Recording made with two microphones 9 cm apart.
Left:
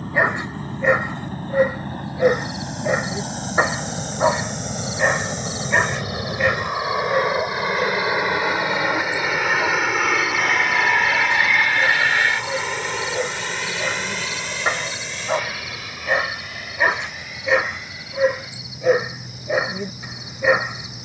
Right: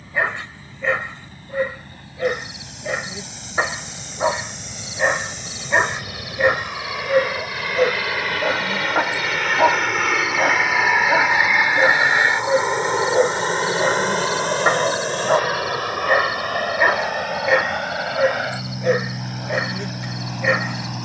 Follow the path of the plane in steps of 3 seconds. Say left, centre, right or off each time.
left, left, left, centre, right, right, right.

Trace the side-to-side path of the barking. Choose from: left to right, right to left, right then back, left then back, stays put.
right then back.